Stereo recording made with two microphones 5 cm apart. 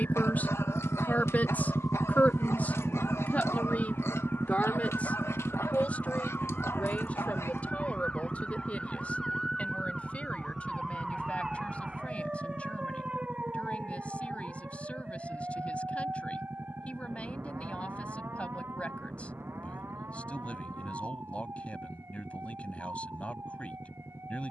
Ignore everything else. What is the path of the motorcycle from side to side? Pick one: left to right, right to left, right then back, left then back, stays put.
left to right.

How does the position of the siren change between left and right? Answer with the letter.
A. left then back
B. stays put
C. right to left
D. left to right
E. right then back
D.